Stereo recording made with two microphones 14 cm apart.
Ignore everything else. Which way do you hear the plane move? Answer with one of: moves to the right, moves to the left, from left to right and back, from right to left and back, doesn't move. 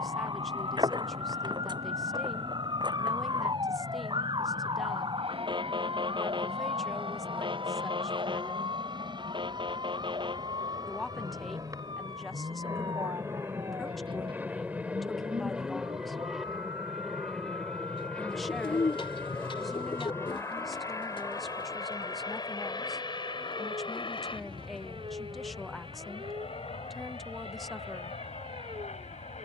moves to the left.